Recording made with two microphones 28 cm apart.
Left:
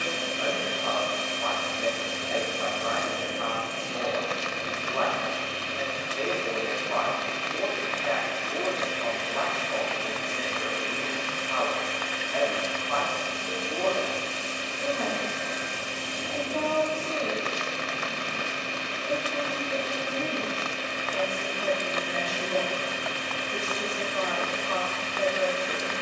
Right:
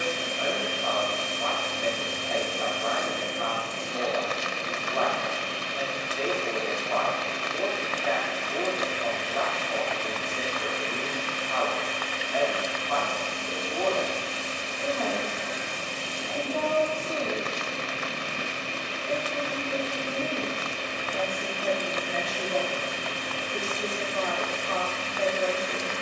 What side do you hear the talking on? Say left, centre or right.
left.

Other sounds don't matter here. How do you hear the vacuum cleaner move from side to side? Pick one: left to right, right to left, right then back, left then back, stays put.
right then back.